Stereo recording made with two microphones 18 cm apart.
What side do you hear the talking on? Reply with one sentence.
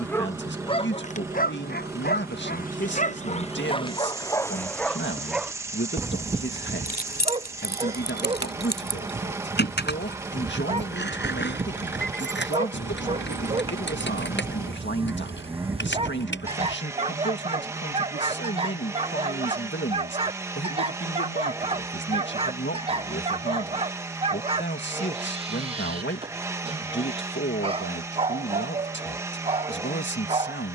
In this clip you hear the talking on the left.